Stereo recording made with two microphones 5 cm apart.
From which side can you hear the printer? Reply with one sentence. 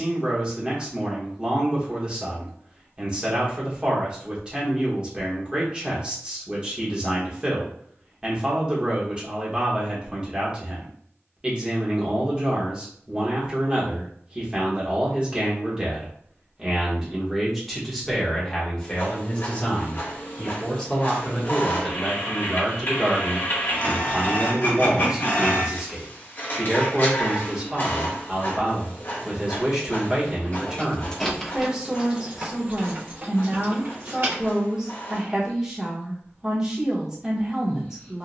In this clip you hear the printer on the left.